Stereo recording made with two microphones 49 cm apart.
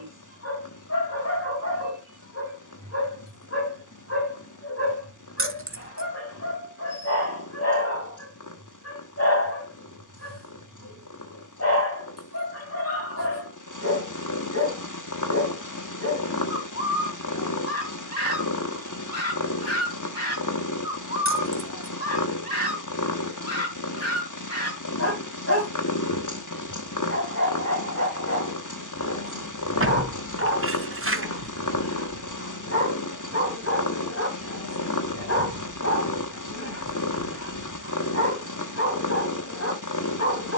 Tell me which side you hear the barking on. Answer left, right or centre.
left.